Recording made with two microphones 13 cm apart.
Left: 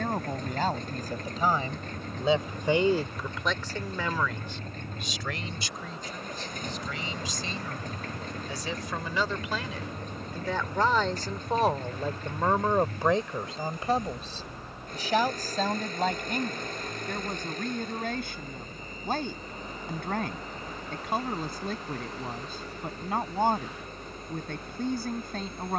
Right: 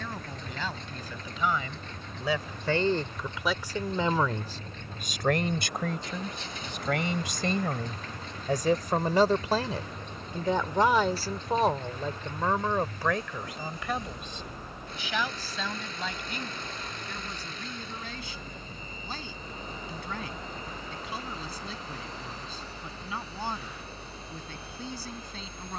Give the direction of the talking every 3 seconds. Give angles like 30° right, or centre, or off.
40° left, 30° right, 60° right, 20° right, 20° left, 50° left, 50° left, 50° left, 50° left.